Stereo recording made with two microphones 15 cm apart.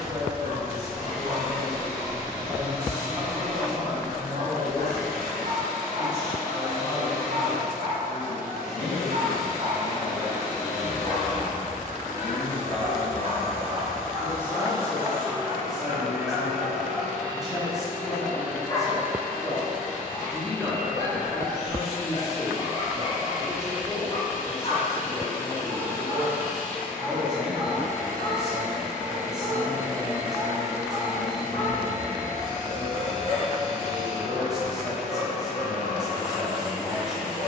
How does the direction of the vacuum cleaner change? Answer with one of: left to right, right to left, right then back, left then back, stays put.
left to right.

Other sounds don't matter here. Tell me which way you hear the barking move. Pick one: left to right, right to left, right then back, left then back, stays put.
right to left.